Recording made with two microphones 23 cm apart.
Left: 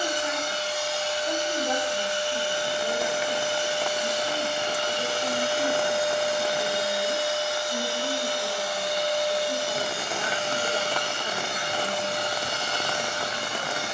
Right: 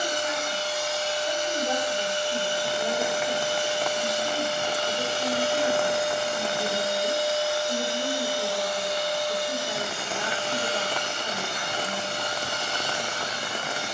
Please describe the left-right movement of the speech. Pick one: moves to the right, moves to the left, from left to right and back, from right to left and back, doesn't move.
from left to right and back.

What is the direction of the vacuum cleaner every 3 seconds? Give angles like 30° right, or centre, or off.
70° right, 70° right, 30° right, 40° left, 60° left.